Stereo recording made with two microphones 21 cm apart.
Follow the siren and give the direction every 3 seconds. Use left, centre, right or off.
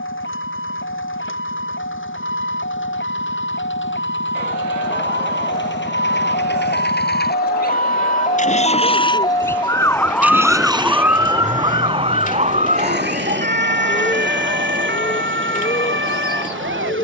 left, left, left, centre, right, right.